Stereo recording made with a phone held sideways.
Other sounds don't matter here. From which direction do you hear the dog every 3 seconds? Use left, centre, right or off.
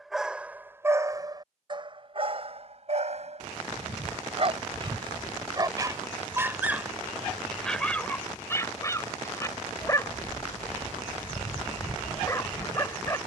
right, right, centre, left, left.